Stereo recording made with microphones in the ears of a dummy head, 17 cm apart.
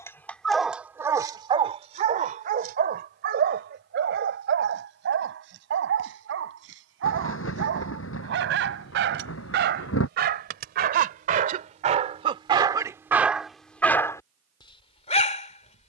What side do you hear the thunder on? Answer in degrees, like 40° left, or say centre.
80° left.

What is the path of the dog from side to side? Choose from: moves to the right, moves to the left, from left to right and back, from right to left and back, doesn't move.
from left to right and back.